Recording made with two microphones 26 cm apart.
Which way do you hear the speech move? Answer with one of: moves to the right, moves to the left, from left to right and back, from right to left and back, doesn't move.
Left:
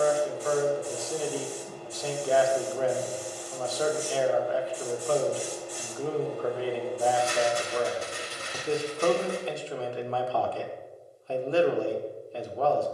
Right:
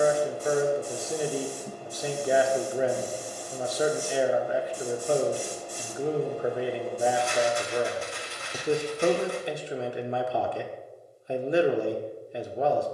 doesn't move.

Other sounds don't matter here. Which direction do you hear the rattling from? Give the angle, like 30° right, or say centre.
40° left.